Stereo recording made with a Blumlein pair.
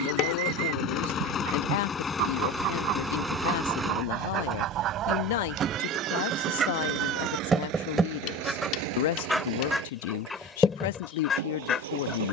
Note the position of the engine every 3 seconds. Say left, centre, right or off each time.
left, centre, right, right.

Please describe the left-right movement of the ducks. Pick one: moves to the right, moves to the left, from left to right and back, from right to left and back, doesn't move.
moves to the left.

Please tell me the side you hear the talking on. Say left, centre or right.
left.